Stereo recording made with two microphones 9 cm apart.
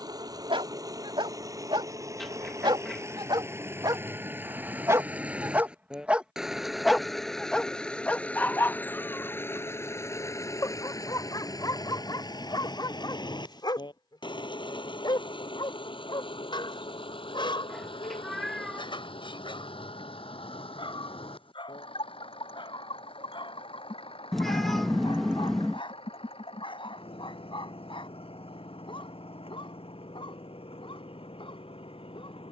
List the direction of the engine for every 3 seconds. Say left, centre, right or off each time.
right, right, centre, left, left, left, left, left, left, left, left.